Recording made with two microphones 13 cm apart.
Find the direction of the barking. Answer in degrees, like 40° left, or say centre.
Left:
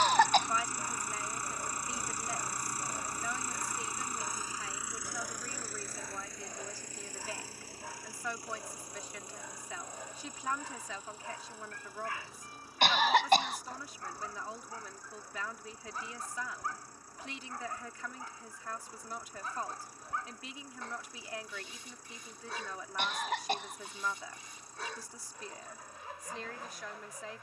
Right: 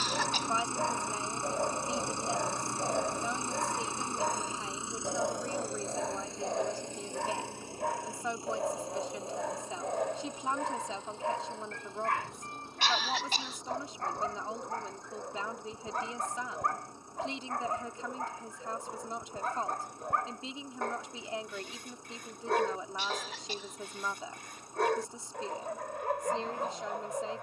60° right.